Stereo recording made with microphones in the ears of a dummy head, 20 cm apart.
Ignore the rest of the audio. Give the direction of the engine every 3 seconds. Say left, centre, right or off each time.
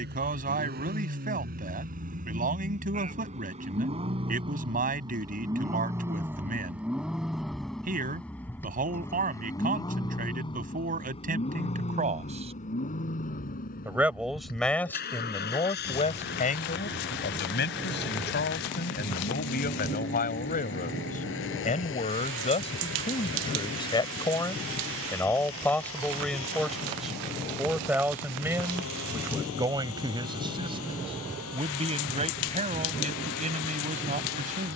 right, right, centre, left, left, left, left, left, left, left, left, left.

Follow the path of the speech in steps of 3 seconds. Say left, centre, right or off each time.
right, right, right, right, centre, left, left, left, centre, centre, right, right.